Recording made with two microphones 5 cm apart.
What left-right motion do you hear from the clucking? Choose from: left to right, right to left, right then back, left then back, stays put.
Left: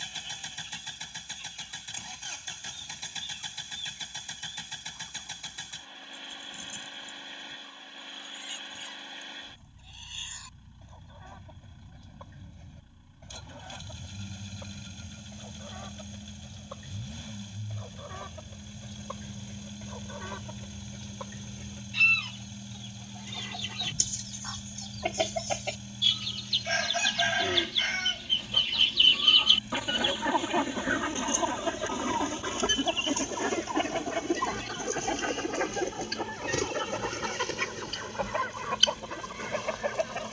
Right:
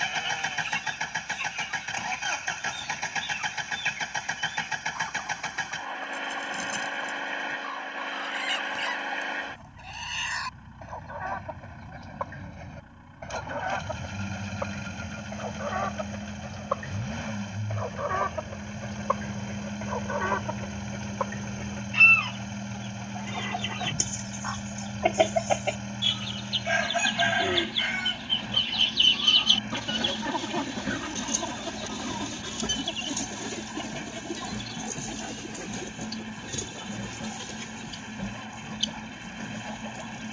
right to left.